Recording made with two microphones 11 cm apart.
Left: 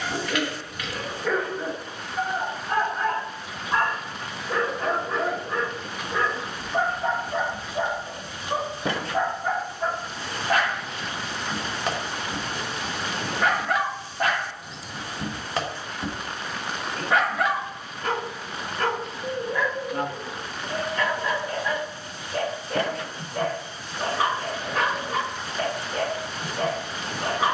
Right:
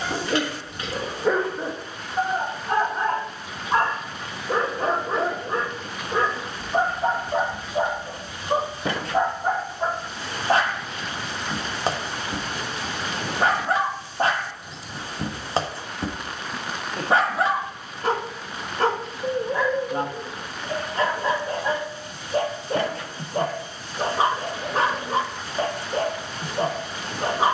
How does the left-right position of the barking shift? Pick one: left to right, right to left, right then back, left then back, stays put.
stays put.